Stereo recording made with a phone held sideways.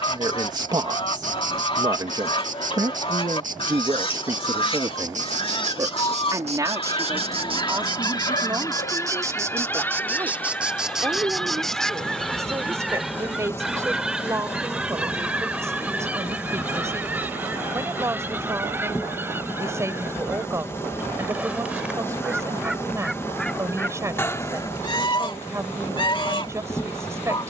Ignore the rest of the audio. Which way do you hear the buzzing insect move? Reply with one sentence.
In this clip you hear the buzzing insect move from right to left.